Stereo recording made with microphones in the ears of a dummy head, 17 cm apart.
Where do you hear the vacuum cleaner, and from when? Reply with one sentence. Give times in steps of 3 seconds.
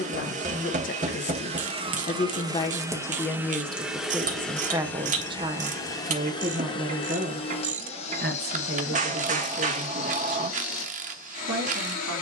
You can hear the vacuum cleaner on the right from 0 s, in the centre from 3 s and on the left from 6 s.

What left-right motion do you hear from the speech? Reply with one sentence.
In this clip you hear the speech move from left to right.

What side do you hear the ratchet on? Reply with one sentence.
In this clip you hear the ratchet on the right.